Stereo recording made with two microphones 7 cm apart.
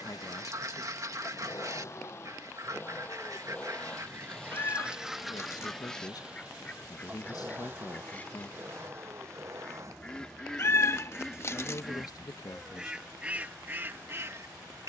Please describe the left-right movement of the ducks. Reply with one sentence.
In this clip you hear the ducks go left and come back.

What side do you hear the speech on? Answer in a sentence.
You can hear the speech on the left.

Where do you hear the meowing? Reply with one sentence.
You can hear the meowing on the left.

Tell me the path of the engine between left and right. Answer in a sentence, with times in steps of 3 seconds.
You can hear the engine on the left from 0 s, in the centre from 3 s and on the right from 6 s.